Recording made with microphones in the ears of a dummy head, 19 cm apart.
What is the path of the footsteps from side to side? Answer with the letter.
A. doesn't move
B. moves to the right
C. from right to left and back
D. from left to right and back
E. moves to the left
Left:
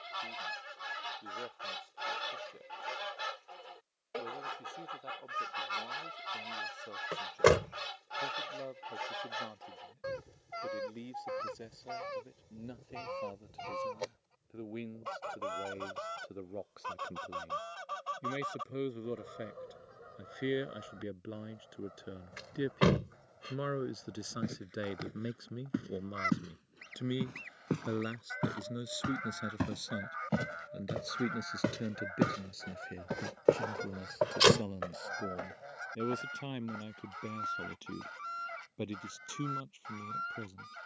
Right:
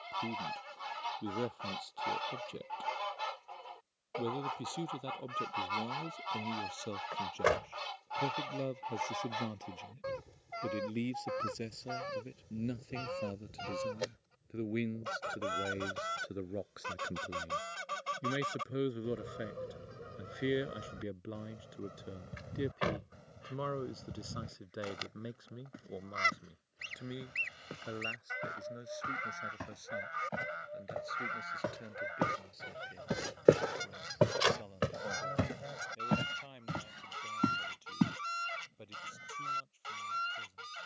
B.